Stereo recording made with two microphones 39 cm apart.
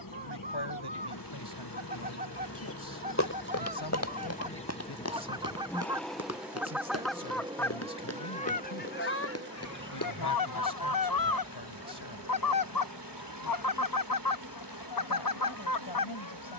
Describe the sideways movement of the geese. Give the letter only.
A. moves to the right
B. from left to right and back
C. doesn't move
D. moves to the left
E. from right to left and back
D.